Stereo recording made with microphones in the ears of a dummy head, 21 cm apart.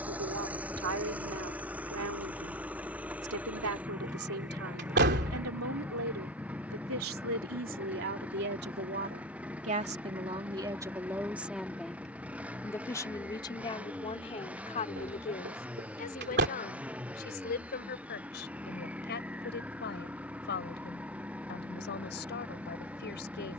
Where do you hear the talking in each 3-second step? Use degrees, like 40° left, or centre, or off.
60° right, 60° right, 50° right, 20° right, 20° left, 40° left, 50° left, 50° left.